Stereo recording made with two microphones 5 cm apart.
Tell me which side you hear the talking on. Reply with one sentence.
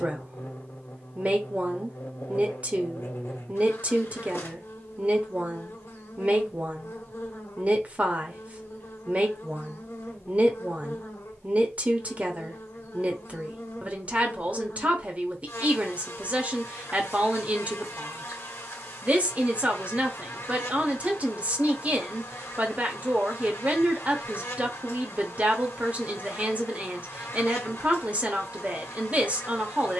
In this clip you hear the talking on the right.